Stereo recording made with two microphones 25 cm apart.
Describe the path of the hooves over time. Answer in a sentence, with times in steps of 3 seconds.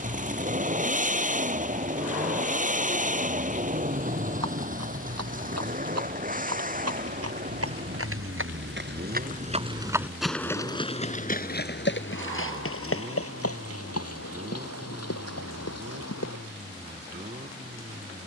You can hear the hooves not at all from 0 s, on the right from 3 s, in the centre from 9 s and on the left from 12 s.